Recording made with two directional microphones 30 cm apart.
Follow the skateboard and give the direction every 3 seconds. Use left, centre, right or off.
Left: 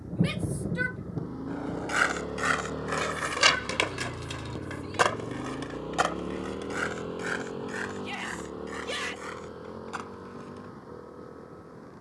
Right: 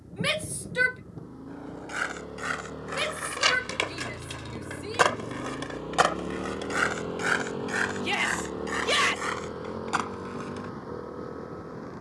left, centre, right, right.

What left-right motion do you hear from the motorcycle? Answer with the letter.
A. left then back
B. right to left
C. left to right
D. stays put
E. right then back
C.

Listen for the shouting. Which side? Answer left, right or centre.
right.